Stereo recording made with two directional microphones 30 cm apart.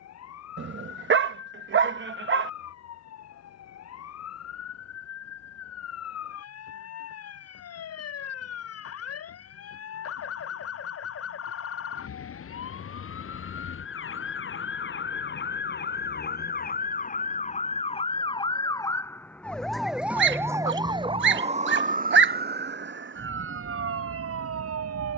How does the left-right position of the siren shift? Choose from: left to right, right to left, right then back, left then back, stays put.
left to right.